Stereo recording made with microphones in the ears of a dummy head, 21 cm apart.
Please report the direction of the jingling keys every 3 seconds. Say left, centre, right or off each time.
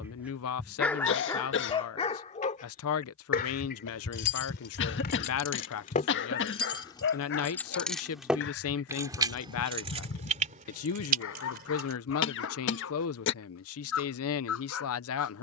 off, left, centre, right, off.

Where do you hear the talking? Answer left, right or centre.
left.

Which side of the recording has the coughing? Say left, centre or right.
left.